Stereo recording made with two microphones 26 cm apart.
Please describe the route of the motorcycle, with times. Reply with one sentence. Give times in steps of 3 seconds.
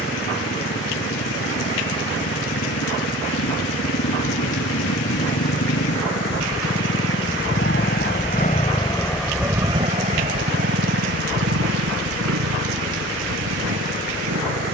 You can hear the motorcycle on the left from 0 s and on the right from 9 s.